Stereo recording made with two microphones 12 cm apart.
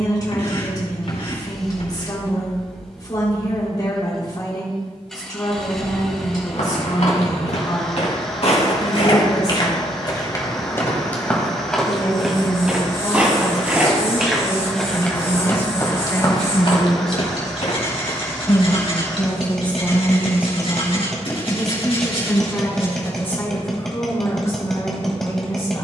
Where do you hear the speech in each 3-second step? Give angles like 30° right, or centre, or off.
30° left, 30° left, 30° left, 30° left, 30° left, 20° left, 10° right, 10° left, 30° left.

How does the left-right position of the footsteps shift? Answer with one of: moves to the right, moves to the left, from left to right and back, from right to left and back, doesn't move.
from left to right and back.